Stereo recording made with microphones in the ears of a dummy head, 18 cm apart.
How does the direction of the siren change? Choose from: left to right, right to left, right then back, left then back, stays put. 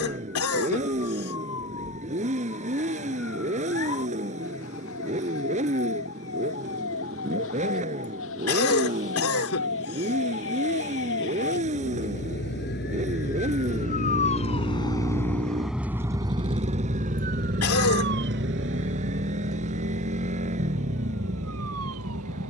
left to right.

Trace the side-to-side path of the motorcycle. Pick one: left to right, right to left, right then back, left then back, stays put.
stays put.